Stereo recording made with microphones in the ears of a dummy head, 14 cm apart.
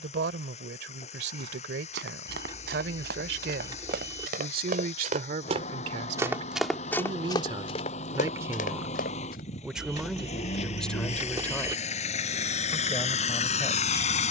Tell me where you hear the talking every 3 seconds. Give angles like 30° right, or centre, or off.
80° right, 60° right, 30° right, centre, 20° left.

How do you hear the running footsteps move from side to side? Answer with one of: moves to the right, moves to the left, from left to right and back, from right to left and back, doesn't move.
moves to the left.